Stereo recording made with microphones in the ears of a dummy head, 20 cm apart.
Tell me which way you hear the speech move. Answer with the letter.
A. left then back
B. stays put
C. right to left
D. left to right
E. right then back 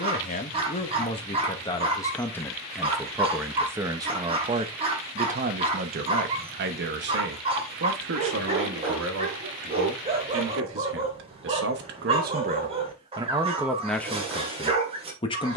E.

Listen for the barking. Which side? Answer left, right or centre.
right.